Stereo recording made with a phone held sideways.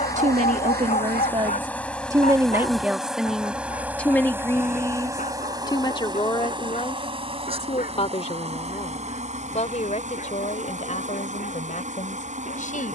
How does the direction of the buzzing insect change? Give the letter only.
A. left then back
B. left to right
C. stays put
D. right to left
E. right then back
B.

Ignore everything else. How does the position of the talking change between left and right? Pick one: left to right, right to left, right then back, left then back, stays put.
right to left.